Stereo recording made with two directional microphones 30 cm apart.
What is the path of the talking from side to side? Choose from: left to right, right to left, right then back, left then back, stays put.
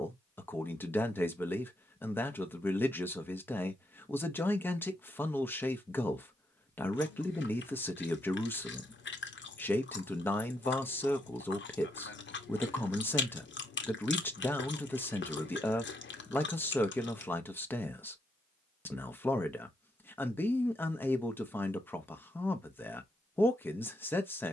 stays put.